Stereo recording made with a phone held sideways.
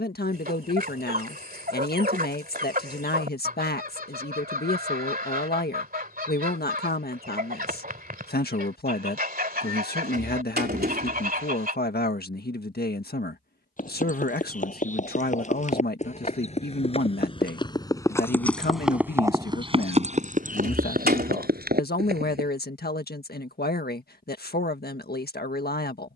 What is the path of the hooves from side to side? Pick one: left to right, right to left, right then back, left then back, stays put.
left to right.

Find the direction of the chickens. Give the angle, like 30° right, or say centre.
70° right.